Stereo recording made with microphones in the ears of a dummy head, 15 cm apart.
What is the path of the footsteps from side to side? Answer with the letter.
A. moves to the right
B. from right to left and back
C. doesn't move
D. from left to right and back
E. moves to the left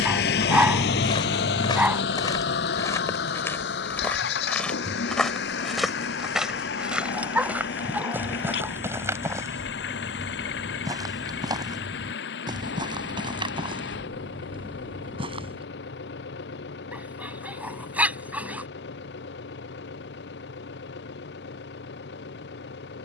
A.